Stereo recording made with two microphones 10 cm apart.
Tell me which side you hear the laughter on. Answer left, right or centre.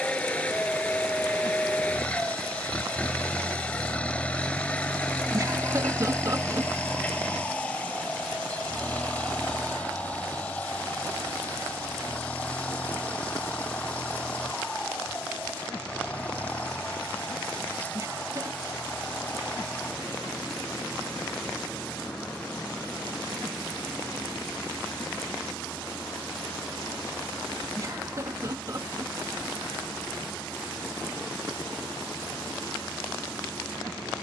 right.